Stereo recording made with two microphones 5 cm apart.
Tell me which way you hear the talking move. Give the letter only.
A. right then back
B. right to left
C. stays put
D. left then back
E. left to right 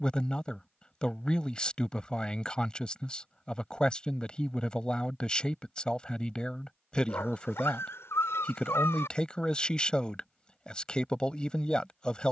C.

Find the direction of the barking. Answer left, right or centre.
left.